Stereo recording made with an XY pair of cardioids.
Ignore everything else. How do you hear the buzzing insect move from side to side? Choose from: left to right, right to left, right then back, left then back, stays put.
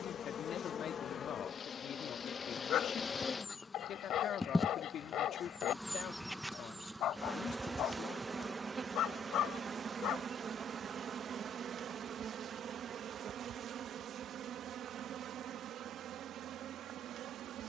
left to right.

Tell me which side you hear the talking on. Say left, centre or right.
left.